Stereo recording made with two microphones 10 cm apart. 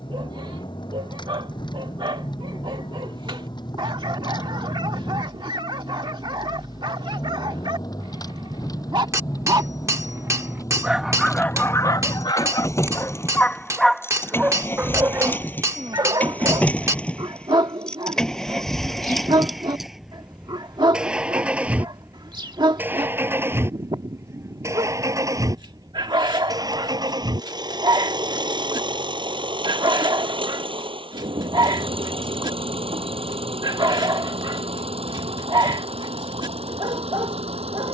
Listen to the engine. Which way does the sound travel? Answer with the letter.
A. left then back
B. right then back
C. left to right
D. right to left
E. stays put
C.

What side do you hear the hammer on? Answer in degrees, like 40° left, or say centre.
30° right.